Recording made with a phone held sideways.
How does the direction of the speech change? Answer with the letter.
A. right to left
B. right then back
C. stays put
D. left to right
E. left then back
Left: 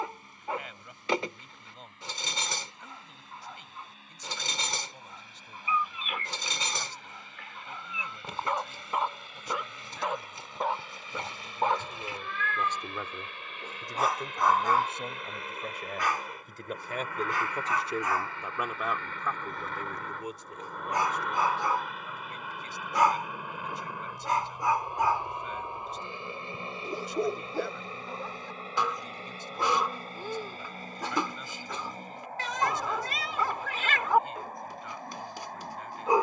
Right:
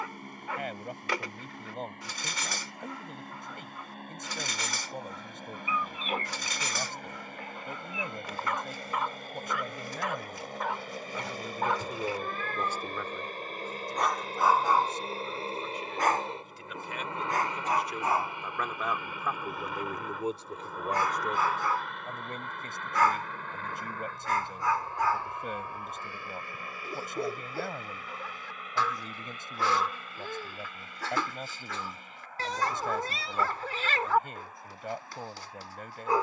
E.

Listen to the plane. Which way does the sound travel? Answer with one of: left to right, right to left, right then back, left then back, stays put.
right to left.